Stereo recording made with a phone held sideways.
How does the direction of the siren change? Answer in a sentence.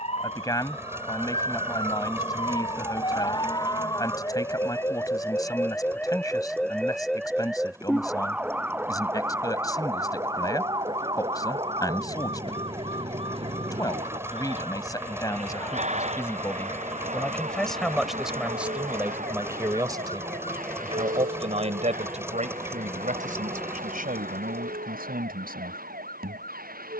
In this clip you hear the siren move from left to right.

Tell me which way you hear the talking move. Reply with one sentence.
You can hear the talking travel towards the right.